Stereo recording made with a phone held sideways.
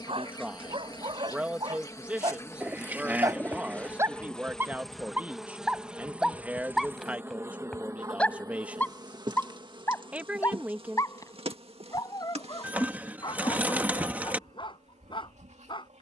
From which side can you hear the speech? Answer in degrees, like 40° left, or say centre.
10° right.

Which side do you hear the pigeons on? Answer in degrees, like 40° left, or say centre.
10° right.